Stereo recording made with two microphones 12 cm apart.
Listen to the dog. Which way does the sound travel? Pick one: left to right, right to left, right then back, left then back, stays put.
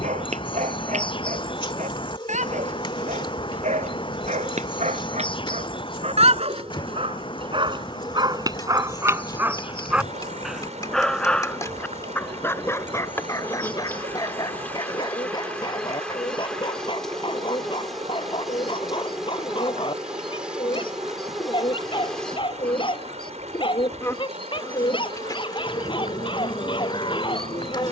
right to left.